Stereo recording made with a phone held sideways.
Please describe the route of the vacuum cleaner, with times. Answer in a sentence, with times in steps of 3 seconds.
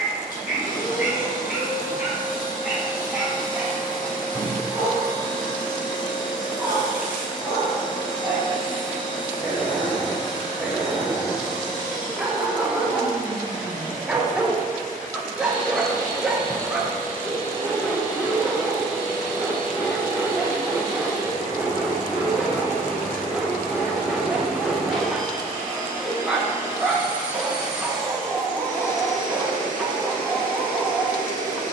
You can hear the vacuum cleaner on the left from 0 s, in the centre from 24 s and on the left from 30 s.